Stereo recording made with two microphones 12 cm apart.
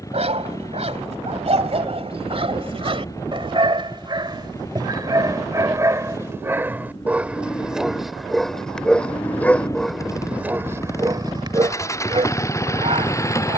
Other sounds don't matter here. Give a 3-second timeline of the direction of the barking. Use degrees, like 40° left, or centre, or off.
50° right, 40° right, 10° right, 20° right, 50° right.